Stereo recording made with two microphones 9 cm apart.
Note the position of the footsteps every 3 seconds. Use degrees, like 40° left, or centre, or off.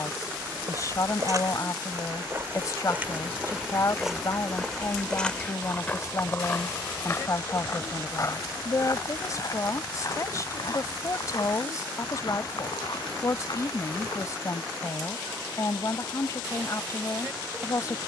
40° right, centre, 30° left, 50° left, 60° left, off.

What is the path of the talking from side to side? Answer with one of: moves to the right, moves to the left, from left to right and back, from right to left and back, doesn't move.
doesn't move.